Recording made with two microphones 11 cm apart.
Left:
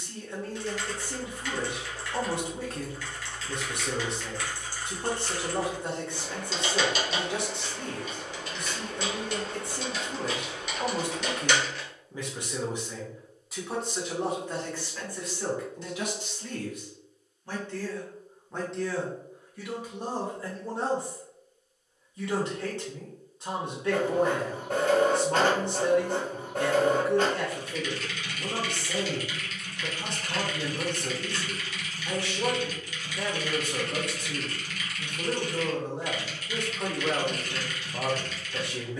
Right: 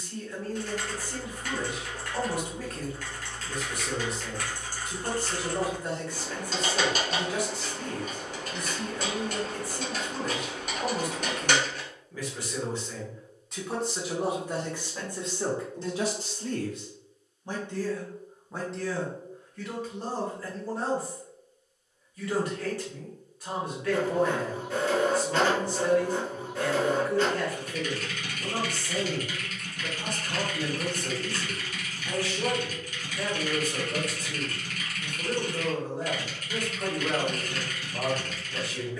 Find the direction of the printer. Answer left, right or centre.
left.